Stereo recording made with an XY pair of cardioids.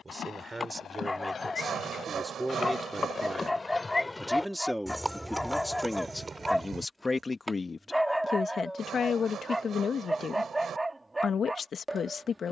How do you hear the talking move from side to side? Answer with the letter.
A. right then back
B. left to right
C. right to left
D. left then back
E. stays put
C.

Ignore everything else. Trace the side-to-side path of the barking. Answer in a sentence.
You can hear the barking move from left to right.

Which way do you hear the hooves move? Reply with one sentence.
In this clip you hear the hooves move to the right.